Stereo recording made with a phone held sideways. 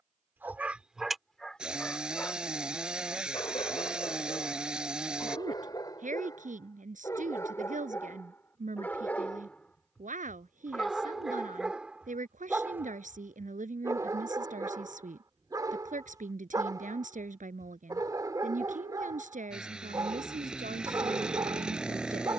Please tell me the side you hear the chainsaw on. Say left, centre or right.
centre.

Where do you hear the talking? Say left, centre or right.
right.